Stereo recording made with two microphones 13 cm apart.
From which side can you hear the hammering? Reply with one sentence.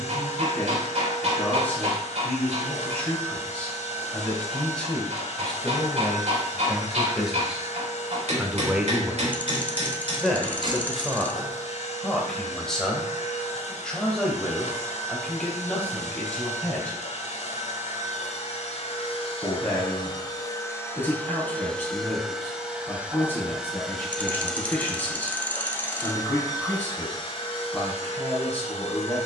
You can hear the hammering on the right.